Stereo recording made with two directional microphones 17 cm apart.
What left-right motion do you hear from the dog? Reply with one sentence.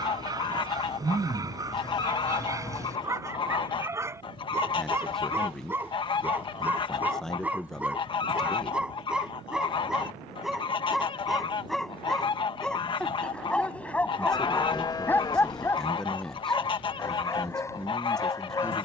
In this clip you hear the dog move to the left.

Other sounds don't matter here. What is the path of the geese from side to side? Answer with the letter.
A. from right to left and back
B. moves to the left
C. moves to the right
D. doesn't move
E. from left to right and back
D.